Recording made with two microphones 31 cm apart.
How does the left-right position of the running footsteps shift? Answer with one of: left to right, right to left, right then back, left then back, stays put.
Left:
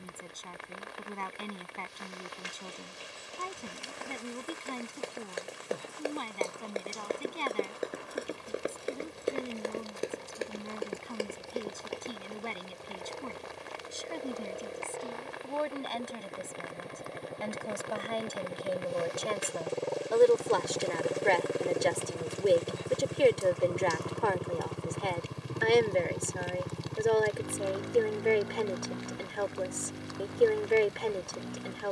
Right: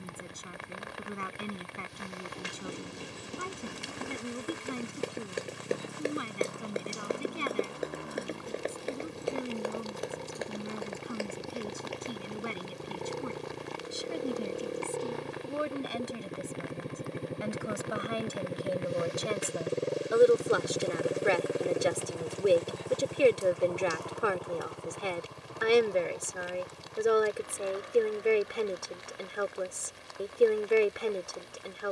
right to left.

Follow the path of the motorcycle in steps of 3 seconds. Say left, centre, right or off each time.
right, right, right, right, right, right, right, centre, left, left, left.